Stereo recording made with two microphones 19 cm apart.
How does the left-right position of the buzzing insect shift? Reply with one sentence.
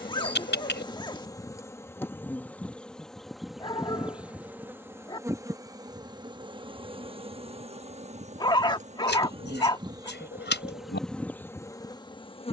In this clip you hear the buzzing insect move from left to right and back again.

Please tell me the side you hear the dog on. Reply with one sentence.
You can hear the dog on the left.